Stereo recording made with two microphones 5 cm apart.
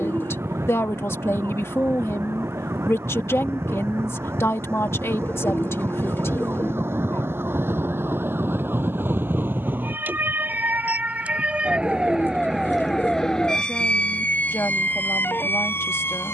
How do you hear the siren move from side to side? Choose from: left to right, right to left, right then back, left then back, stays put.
right to left.